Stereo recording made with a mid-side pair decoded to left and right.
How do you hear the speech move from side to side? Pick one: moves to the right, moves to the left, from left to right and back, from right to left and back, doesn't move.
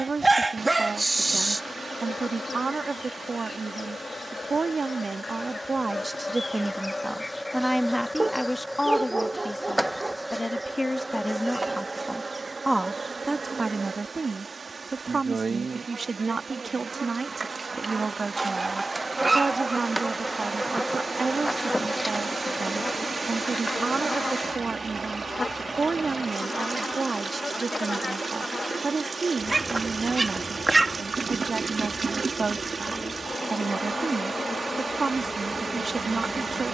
from right to left and back.